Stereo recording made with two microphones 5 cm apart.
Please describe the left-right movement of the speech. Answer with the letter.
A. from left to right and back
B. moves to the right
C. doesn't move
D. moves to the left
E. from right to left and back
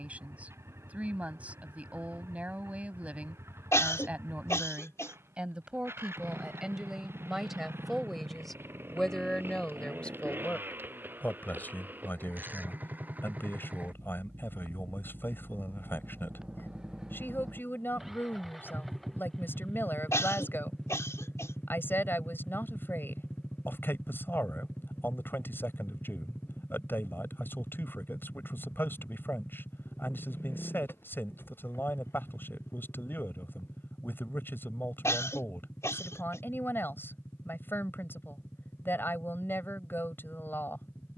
D.